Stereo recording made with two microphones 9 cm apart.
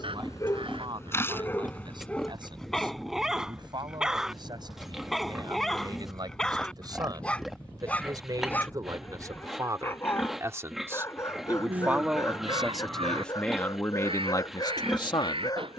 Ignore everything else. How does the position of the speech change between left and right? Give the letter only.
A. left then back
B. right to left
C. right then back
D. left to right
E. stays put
B.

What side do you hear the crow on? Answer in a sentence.
You can hear the crow on the right.